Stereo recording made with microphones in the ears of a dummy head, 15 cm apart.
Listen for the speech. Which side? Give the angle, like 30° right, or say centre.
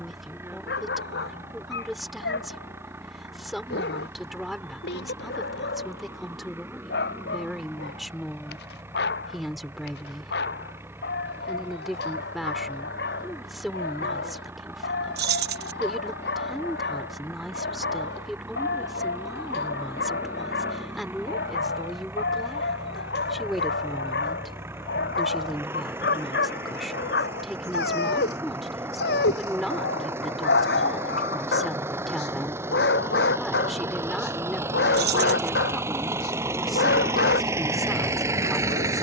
centre.